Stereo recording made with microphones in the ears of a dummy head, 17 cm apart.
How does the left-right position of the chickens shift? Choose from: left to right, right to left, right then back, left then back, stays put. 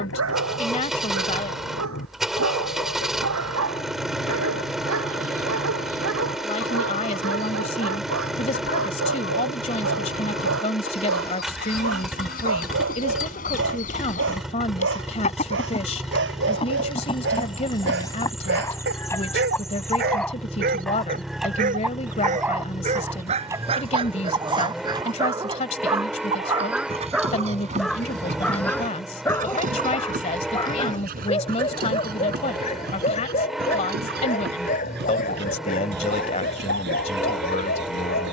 left to right.